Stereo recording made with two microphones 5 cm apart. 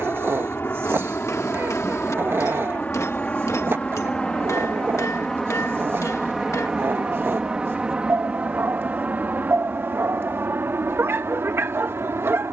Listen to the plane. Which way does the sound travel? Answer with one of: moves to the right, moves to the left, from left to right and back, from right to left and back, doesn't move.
moves to the right.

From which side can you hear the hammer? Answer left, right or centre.
left.